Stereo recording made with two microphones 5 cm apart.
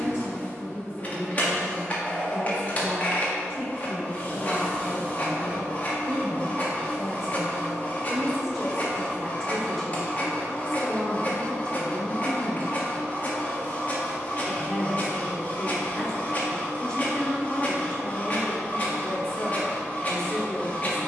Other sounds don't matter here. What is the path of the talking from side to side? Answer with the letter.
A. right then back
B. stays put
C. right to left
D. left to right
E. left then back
C.